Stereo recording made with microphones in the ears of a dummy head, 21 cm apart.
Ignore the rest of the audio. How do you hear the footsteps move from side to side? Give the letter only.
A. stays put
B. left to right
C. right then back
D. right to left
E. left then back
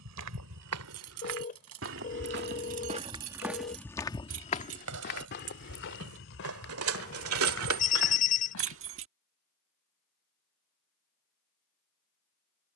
D.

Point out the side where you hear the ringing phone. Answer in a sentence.
You can hear the ringing phone on the left.